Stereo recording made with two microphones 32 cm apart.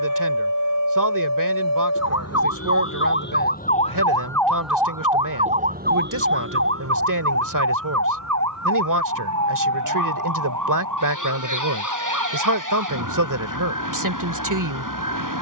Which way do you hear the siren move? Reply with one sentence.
In this clip you hear the siren travel towards the right.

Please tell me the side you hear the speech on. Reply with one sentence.
You can hear the speech on the right.